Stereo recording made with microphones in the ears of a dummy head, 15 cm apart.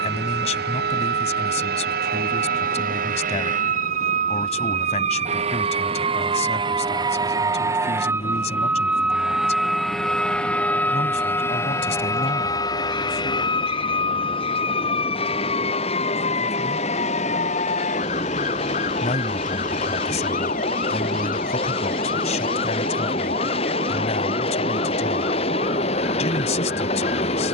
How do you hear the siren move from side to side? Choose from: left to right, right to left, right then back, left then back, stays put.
right to left.